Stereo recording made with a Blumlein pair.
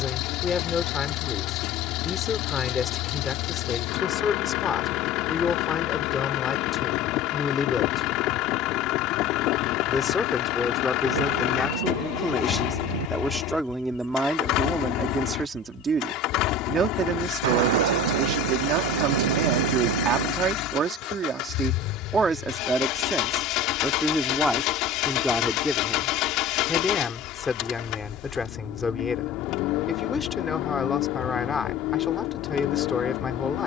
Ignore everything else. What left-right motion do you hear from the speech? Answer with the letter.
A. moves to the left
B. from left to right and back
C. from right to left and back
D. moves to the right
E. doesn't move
B.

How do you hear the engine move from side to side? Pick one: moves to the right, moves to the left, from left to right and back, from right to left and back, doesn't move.
doesn't move.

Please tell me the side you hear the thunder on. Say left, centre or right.
right.